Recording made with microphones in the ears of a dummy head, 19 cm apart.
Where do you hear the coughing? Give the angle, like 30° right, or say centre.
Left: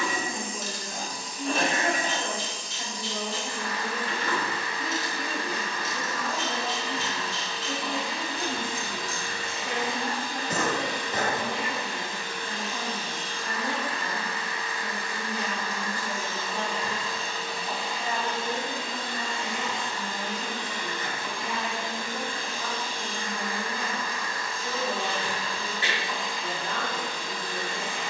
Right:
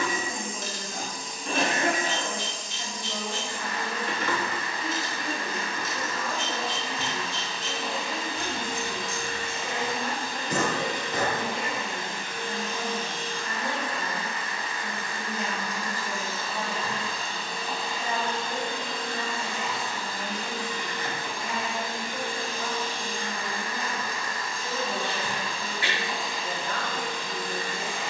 20° left.